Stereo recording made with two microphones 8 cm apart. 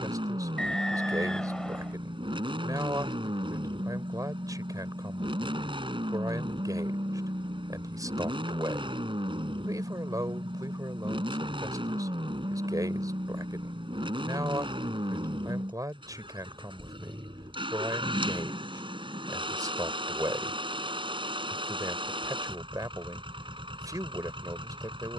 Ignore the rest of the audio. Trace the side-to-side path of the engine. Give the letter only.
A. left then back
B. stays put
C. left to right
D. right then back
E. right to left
B.